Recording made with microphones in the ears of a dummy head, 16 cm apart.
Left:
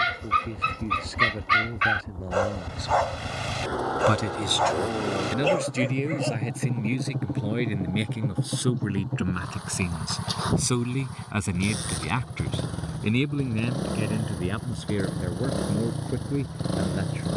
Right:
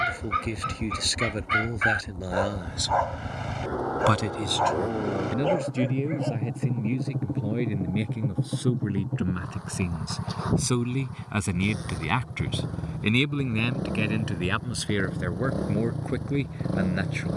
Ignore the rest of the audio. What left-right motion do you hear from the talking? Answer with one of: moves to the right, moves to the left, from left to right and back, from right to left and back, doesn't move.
from right to left and back.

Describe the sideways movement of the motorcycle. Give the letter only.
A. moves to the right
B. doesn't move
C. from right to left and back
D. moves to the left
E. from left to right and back
B.